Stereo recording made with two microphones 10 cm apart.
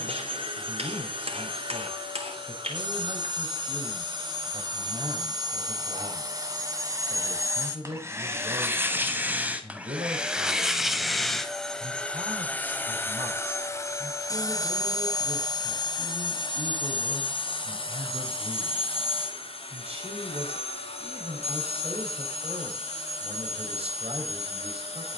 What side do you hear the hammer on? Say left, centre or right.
right.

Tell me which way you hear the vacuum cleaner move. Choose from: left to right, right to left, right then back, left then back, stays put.
right to left.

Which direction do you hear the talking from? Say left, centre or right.
right.